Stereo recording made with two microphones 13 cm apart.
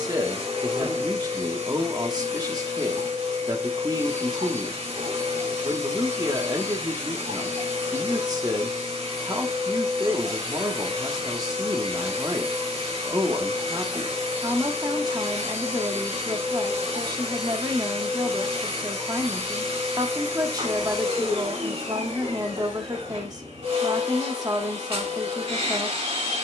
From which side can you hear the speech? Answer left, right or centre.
right.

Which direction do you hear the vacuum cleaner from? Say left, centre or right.
right.